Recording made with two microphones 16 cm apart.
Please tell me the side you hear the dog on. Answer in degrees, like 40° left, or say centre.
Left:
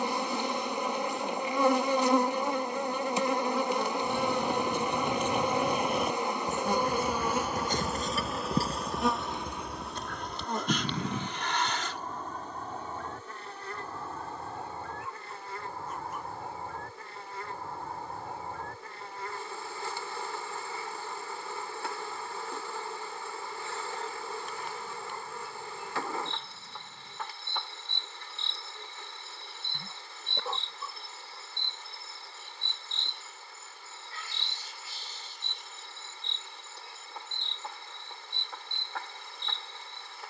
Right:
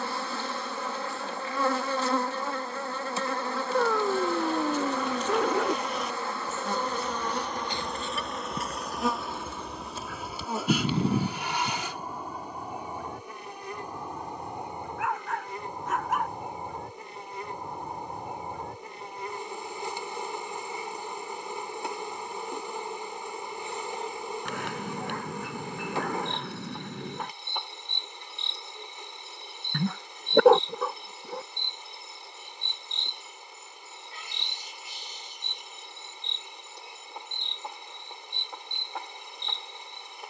80° right.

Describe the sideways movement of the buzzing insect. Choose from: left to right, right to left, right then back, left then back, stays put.
left to right.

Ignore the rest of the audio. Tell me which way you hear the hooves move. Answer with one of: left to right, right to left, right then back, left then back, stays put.
left to right.